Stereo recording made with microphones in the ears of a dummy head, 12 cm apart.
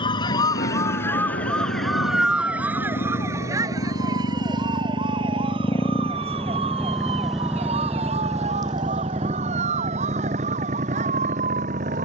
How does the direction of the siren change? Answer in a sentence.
In this clip you hear the siren move to the right.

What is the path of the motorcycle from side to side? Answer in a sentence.
You can hear the motorcycle move to the right.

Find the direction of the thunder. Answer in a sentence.
You can hear the thunder on the left.